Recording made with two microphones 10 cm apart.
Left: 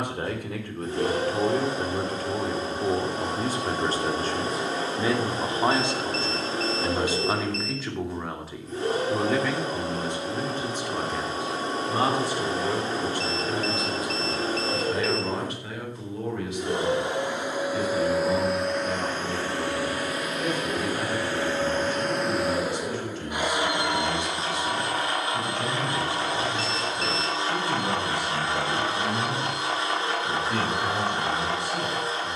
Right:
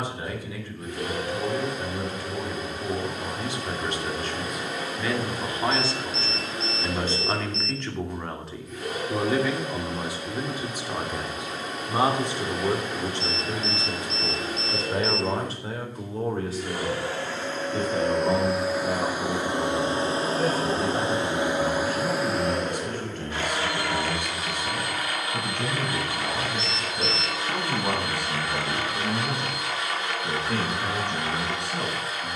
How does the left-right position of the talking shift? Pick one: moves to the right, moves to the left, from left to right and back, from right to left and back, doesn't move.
moves to the right.